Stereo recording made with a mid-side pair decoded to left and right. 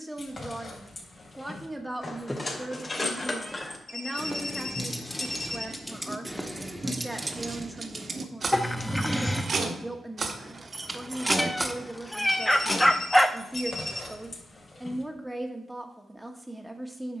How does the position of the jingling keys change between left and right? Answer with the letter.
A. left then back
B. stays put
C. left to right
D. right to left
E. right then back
E.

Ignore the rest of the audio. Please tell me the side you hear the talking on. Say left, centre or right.
centre.